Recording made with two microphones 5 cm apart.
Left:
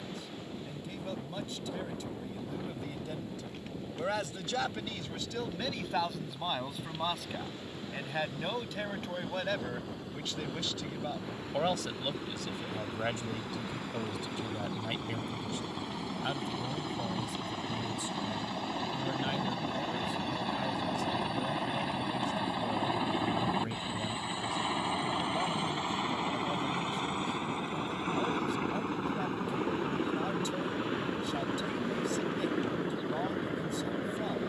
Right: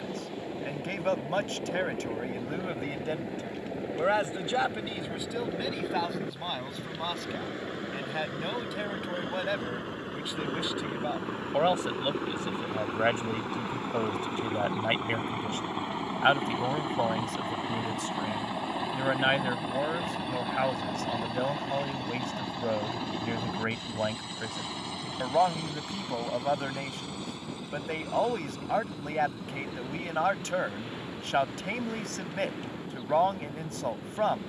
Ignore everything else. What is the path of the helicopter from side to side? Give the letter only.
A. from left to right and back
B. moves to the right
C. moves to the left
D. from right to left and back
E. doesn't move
C.